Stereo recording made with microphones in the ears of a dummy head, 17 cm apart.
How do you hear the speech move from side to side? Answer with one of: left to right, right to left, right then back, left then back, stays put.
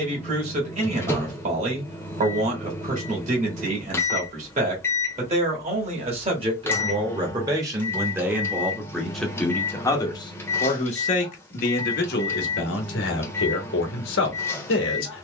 right to left.